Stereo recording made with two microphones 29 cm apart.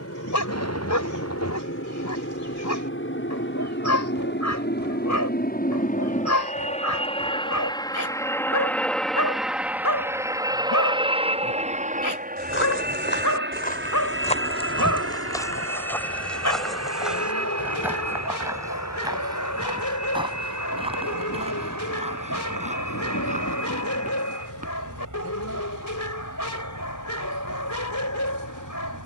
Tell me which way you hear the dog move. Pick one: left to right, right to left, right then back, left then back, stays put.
stays put.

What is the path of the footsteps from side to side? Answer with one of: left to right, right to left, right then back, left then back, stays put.
left to right.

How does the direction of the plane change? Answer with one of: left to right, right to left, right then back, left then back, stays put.
left to right.